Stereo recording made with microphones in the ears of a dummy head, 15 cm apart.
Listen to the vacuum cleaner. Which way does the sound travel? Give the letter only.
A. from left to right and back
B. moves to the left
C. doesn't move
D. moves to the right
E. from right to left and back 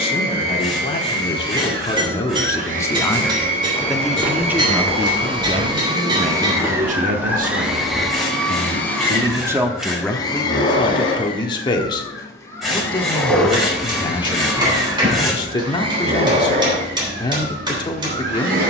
E.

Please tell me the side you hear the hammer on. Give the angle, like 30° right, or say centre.
30° right.